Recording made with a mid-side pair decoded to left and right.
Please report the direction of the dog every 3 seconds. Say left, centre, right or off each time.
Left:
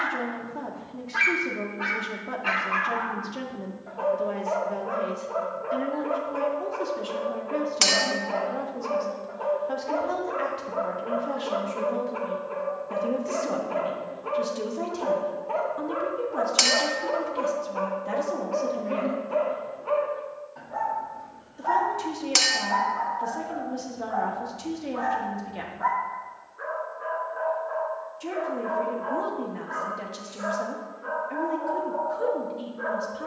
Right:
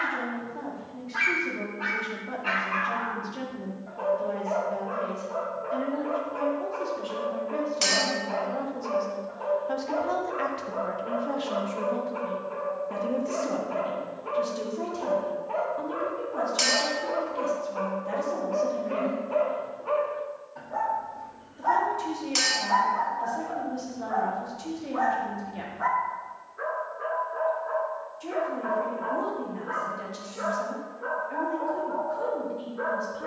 left, left, left, left, left, left, centre, right, right, right, right.